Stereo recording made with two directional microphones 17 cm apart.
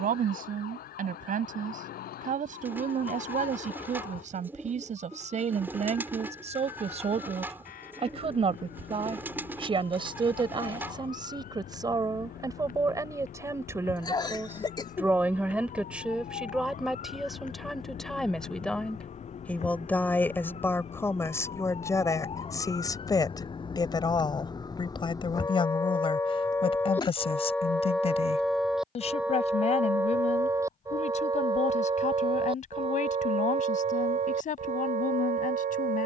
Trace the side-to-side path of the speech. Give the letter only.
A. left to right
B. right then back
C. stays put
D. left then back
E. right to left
E.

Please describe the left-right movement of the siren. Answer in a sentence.
You can hear the siren move from left to right.